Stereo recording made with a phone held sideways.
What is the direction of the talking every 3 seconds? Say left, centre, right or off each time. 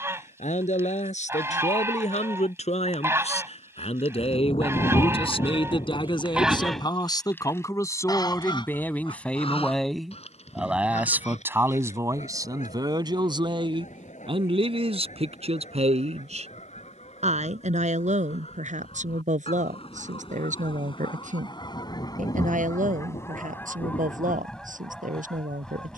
left, left, left, centre, right, right, right, right, right.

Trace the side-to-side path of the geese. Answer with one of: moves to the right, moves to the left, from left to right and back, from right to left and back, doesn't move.
from right to left and back.